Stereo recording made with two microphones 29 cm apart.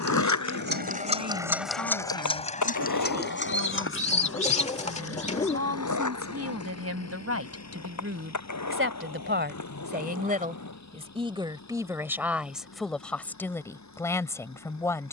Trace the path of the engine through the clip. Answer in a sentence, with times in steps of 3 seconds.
You can hear the engine in the centre from 0 s and on the left from 3 s.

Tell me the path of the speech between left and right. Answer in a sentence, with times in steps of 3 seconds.
You can hear the speech on the right from 0 s and in the centre from 12 s.